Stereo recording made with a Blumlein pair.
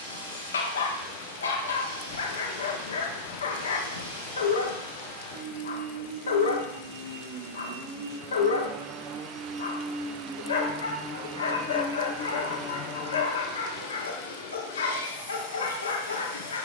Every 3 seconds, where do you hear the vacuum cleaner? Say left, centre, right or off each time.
right, right, right, centre, left, left.